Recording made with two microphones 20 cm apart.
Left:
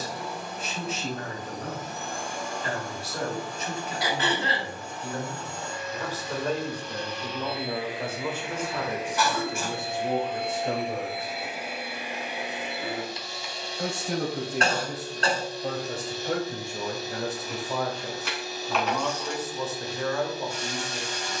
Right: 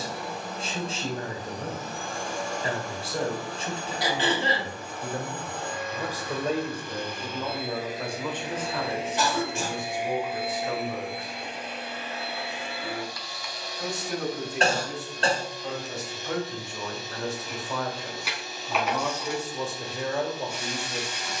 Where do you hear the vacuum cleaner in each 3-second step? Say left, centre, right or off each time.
right, right, right, centre, left, left, left.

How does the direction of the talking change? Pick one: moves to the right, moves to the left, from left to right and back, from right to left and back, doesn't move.
from right to left and back.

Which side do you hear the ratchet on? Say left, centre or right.
centre.